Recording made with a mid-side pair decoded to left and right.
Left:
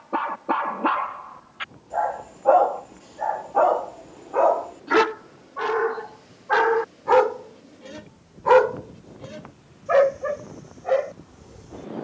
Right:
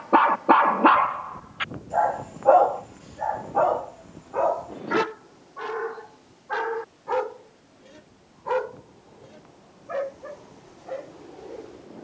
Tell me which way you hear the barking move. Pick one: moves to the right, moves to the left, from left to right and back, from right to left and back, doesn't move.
moves to the left.